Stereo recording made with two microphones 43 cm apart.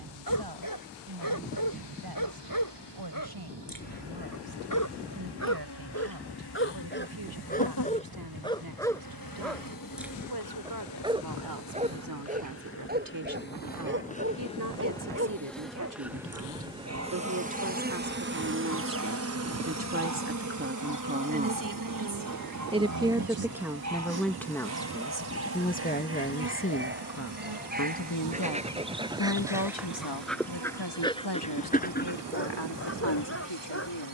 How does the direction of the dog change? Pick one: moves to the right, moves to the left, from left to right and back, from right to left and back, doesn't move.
from left to right and back.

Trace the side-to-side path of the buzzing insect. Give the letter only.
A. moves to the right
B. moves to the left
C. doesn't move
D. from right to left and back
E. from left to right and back
A.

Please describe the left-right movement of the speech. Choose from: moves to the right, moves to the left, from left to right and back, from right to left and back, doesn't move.
moves to the left.